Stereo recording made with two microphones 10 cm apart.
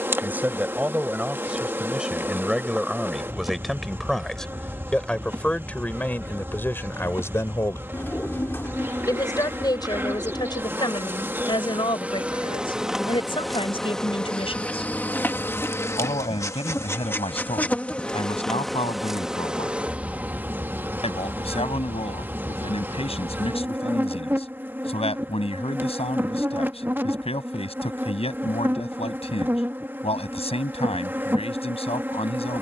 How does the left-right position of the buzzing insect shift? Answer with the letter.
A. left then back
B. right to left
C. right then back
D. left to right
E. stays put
A.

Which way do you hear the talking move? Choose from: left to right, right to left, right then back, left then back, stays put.
right to left.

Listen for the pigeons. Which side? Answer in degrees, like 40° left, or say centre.
20° left.